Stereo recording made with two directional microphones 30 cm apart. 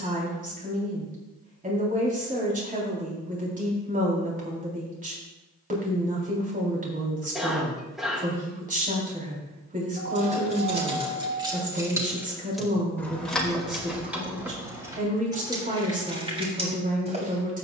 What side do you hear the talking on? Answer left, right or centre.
right.